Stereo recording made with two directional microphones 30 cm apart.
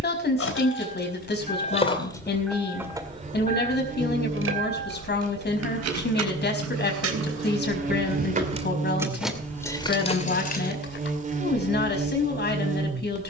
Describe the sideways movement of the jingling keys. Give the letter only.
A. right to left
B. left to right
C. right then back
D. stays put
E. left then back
C.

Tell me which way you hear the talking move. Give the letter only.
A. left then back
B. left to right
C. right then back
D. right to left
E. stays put
E.